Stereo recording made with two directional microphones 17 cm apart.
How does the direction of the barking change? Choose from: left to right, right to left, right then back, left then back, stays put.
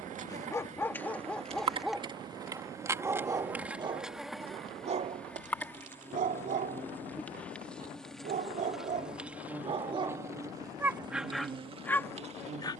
right then back.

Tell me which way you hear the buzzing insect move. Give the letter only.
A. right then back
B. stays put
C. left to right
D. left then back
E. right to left
D.